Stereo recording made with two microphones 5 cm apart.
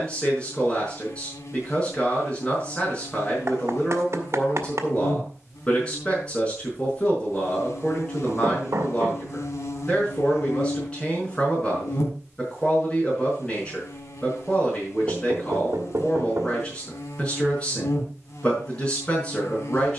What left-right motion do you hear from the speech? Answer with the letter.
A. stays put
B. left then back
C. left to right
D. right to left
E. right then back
A.